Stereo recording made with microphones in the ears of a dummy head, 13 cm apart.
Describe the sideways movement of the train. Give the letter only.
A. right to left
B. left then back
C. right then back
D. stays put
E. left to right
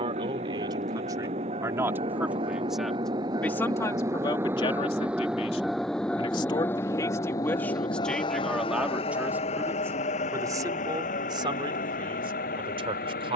A.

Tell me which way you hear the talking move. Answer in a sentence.
In this clip you hear the talking move from right to left and back again.